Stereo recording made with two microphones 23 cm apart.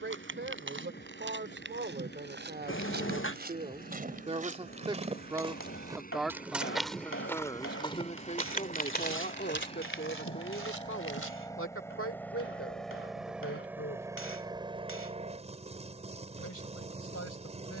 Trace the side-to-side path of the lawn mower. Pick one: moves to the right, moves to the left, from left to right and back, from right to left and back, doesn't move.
moves to the right.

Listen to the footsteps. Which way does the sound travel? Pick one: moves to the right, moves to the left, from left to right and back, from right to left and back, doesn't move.
moves to the left.